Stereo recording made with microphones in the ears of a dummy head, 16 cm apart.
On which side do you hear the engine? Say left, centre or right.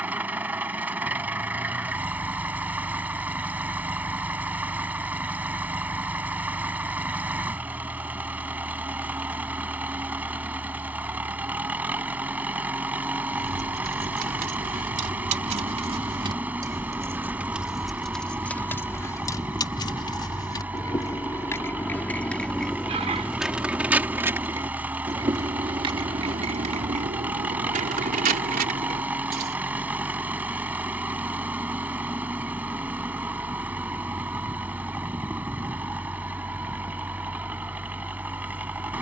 centre.